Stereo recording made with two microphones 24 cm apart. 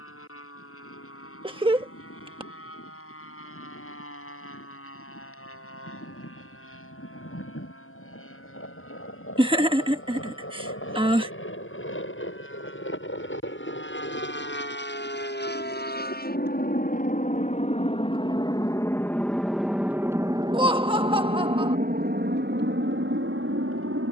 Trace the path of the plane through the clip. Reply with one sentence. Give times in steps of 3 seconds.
You can hear the plane on the left from 0 s, in the centre from 18 s and on the right from 21 s.